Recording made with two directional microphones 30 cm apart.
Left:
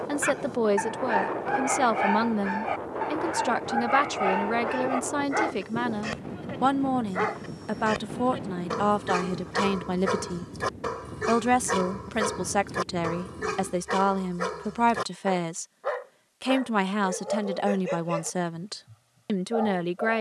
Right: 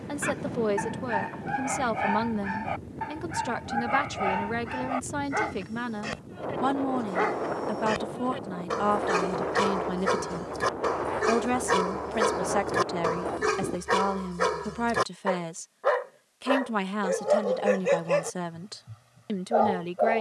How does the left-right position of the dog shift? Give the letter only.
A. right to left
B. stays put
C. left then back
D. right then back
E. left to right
E.